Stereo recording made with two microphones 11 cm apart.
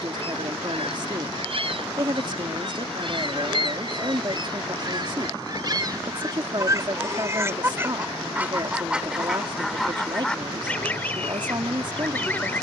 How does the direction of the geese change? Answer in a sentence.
In this clip you hear the geese travel towards the left.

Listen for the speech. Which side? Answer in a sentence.
You can hear the speech on the right.